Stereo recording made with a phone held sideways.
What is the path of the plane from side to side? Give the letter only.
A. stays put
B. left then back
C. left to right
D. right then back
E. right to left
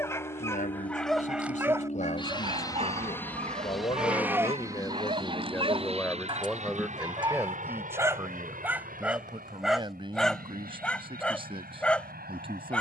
C.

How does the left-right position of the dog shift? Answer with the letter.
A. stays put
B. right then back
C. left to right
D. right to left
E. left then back
B.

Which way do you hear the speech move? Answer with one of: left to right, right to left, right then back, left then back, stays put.
left to right.